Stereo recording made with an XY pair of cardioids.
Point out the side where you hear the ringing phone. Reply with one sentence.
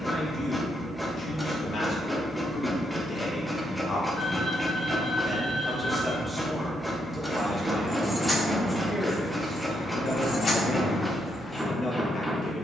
You can hear the ringing phone on the left.